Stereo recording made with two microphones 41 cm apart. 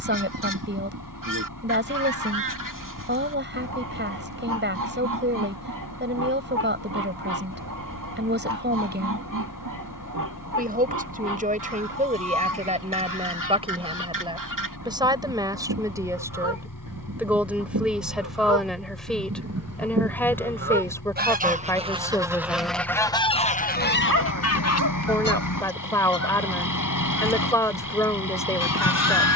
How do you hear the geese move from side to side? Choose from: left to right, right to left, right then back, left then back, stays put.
right to left.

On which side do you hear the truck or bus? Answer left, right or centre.
left.